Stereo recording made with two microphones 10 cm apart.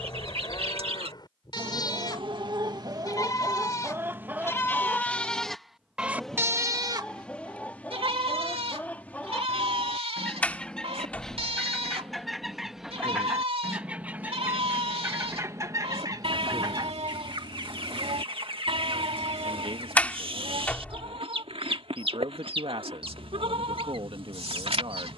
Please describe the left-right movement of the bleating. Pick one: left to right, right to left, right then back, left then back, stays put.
left to right.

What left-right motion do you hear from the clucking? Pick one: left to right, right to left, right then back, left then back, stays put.
left then back.